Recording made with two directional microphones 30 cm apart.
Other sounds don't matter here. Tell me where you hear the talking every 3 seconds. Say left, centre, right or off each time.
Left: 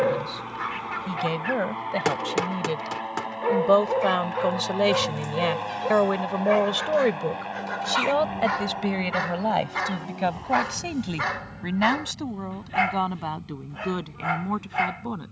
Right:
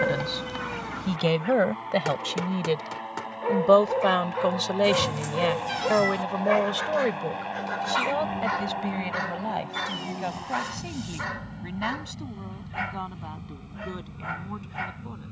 right, centre, left, left, left.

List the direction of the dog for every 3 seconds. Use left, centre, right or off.
left, centre, centre, left, left.